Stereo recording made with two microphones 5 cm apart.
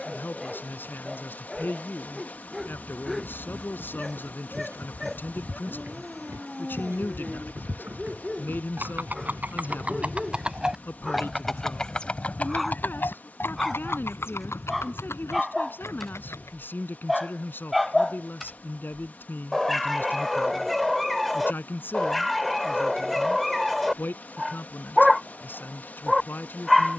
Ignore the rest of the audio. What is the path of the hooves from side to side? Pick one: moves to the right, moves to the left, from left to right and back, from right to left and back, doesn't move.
moves to the left.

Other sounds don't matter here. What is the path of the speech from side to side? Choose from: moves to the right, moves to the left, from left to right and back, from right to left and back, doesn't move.
doesn't move.